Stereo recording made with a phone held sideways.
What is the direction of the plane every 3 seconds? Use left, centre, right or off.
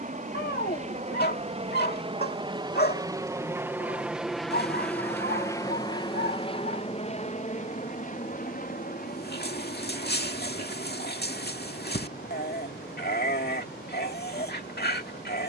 right, centre, left, left, left.